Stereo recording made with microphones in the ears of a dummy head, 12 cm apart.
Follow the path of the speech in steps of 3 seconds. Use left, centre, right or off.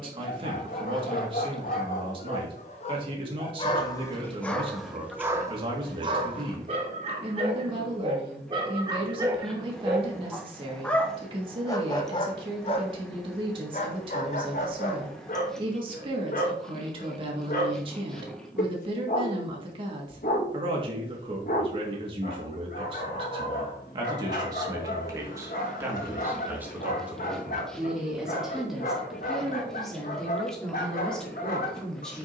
right, right, right, right, right, right, right, right, right, centre, centre.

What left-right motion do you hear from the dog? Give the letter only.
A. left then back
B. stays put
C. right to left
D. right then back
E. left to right
D.